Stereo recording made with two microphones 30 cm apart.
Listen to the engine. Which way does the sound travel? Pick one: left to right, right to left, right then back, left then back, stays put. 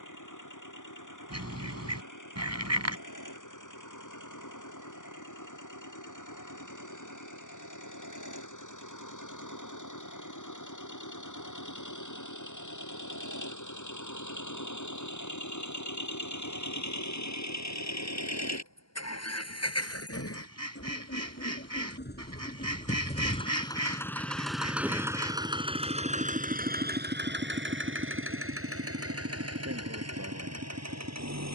left to right.